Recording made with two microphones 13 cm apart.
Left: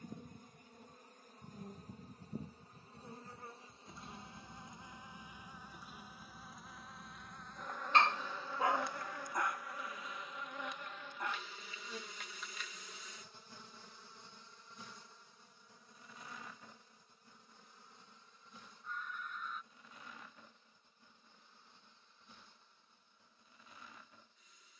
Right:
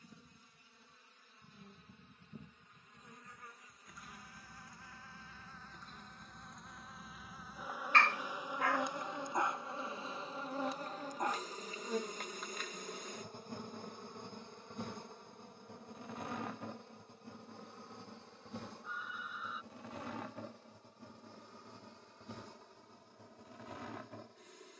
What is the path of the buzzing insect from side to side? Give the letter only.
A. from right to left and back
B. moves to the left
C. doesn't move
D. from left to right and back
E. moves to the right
E.